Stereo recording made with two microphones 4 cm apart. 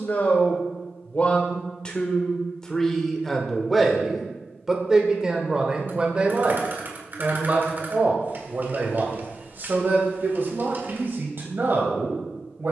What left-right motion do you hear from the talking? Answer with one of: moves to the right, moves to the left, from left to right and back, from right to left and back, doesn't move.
moves to the right.